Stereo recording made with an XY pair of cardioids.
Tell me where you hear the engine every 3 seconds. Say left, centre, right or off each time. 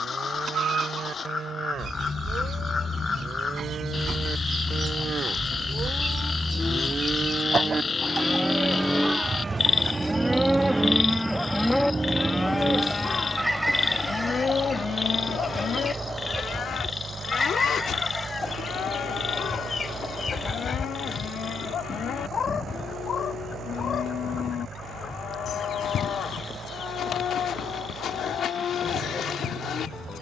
left, left, centre, centre, right, right, right, right, right, right.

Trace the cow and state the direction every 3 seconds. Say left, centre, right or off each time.
right, right, right, centre, left, left, left, left, left, left.